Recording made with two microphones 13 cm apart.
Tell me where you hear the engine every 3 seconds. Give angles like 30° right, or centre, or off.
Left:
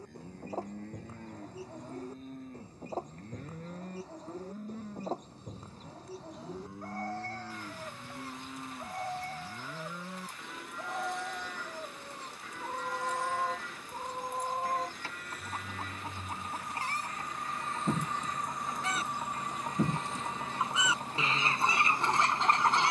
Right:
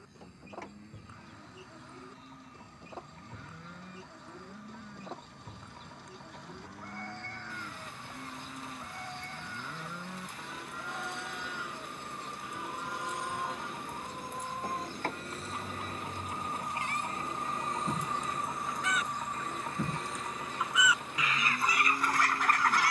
80° right, 80° right, 80° right, 70° right, 60° right, 30° right, 10° left, 40° left.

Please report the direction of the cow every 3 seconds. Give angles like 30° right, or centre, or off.
50° left, 40° left, 20° left, centre, 20° right, 30° right, 40° right, 40° right.